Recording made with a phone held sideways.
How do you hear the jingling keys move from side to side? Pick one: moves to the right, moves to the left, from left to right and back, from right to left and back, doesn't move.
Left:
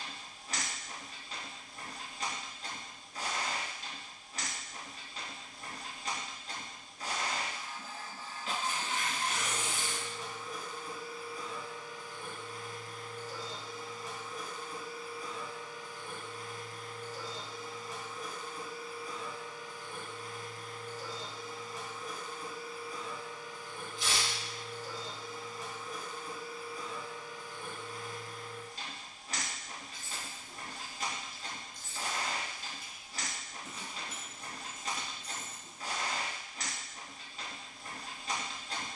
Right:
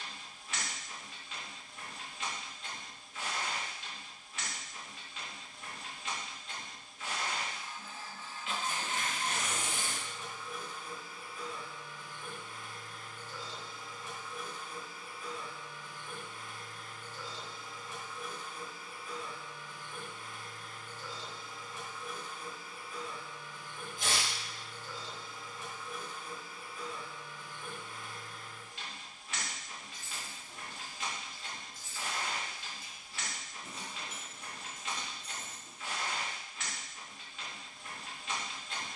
from left to right and back.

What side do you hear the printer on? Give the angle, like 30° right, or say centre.
40° left.